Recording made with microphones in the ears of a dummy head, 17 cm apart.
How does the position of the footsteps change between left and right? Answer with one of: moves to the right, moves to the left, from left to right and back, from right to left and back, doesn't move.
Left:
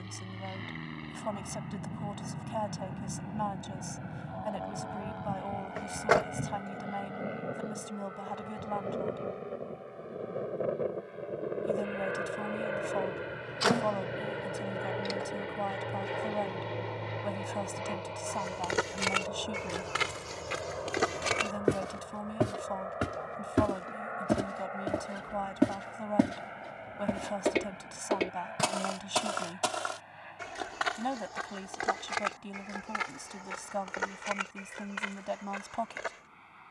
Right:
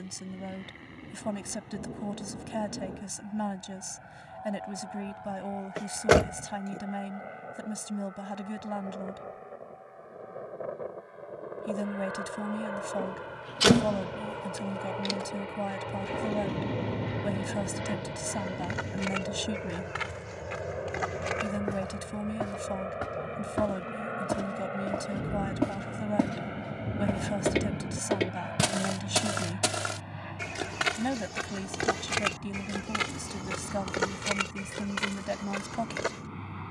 moves to the right.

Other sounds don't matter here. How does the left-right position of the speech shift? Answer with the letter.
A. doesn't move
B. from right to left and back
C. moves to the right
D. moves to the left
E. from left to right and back
A.